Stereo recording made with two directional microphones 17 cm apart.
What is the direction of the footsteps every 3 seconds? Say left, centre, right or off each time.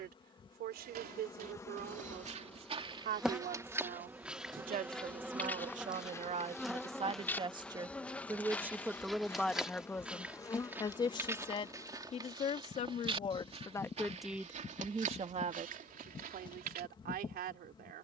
right, centre, centre, centre, right, right.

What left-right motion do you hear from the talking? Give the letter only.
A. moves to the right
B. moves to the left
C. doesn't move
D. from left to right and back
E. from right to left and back
E.